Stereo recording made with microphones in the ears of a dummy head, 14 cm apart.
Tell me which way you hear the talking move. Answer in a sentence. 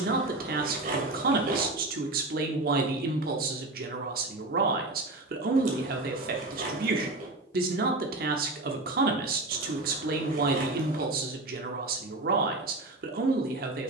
You can hear the talking stay put.